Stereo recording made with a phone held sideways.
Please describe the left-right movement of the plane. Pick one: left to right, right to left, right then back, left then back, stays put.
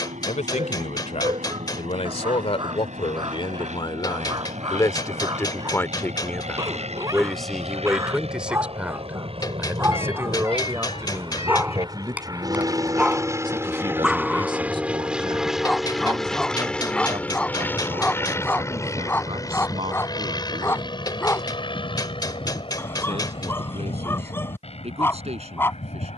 right to left.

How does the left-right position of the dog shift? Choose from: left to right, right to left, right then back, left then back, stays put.
right to left.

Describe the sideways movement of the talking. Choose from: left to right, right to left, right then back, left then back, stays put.
left to right.